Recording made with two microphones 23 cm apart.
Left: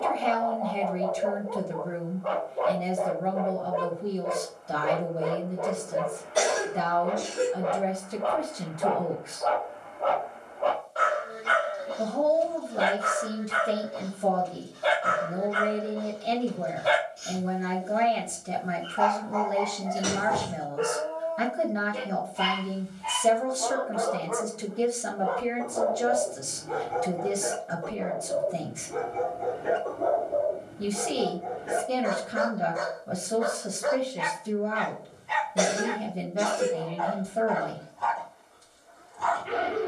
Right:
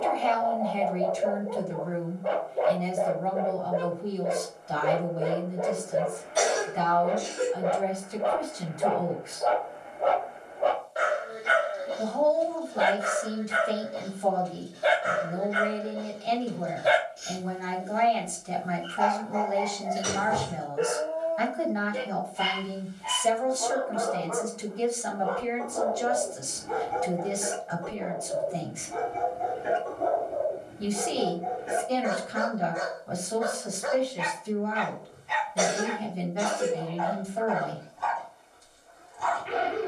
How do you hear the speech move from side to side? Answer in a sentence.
In this clip you hear the speech stay in one place.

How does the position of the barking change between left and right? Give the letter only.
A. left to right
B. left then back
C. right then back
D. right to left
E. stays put
D.